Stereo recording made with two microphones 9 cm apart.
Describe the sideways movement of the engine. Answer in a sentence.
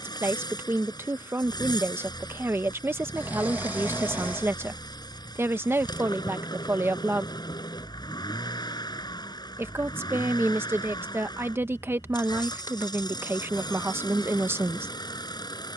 In this clip you hear the engine stay put.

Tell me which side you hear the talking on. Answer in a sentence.
In this clip you hear the talking on the right.